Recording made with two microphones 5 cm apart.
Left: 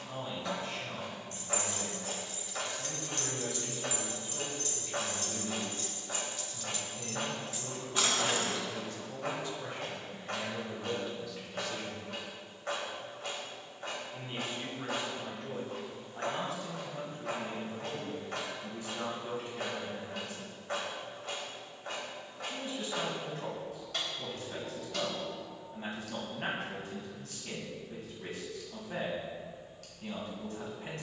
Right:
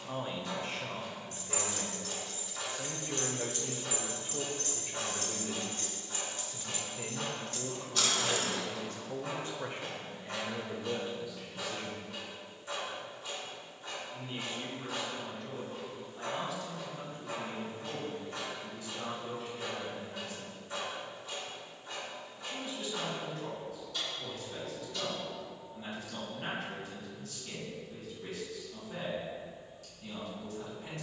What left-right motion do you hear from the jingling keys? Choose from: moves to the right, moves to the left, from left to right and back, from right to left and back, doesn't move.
from left to right and back.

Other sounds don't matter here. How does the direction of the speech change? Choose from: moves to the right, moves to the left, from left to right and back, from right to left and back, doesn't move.
moves to the left.